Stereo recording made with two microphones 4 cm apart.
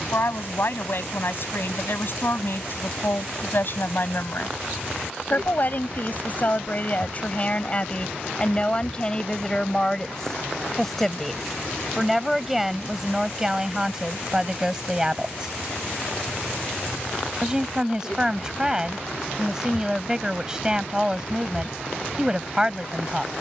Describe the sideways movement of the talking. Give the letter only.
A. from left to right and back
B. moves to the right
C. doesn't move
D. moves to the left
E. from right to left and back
B.